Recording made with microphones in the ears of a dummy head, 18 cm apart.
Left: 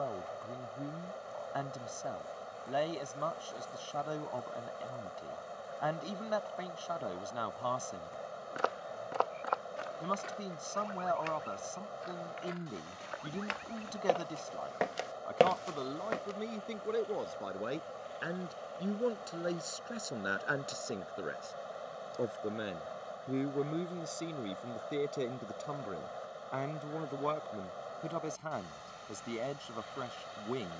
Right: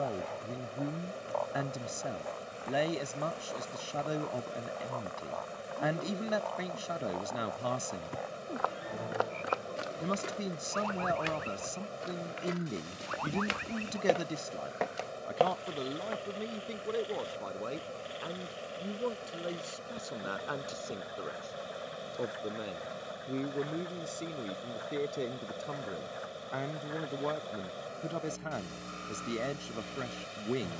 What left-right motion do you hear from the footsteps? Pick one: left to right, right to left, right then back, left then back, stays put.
right then back.